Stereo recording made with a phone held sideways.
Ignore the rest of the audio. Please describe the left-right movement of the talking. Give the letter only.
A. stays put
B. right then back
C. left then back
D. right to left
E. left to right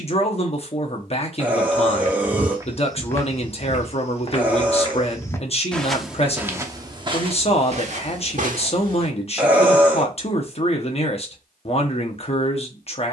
A.